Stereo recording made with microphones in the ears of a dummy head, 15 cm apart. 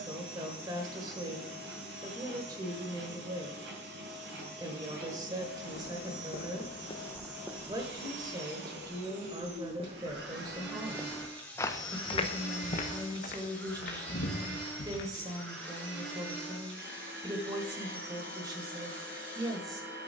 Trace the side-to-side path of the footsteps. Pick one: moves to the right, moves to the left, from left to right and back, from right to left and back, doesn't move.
from left to right and back.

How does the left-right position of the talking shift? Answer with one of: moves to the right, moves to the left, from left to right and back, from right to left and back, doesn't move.
doesn't move.